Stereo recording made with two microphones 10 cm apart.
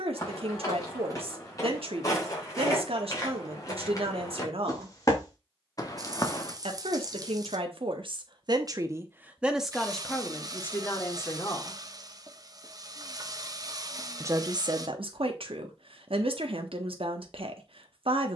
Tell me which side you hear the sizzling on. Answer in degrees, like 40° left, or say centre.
40° right.